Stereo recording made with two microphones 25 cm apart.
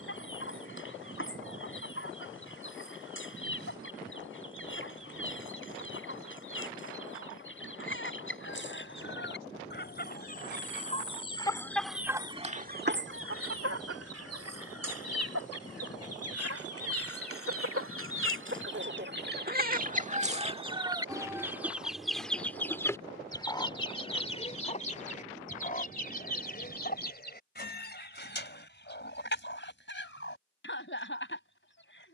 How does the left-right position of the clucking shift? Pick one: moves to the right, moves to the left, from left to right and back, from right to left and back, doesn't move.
from left to right and back.